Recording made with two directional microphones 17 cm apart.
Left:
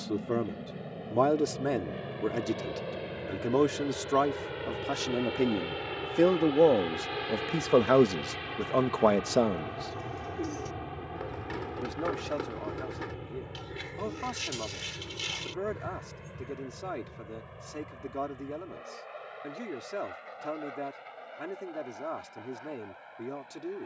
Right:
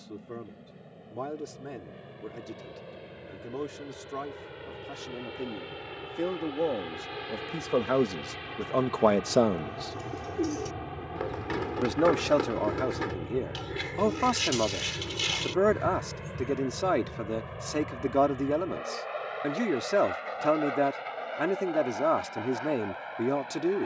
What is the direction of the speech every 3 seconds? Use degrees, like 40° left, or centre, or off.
60° left, 60° left, 30° left, 20° right, 60° right, 60° right, 60° right, 60° right.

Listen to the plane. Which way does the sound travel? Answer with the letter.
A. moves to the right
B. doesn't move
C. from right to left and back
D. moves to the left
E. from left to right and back
A.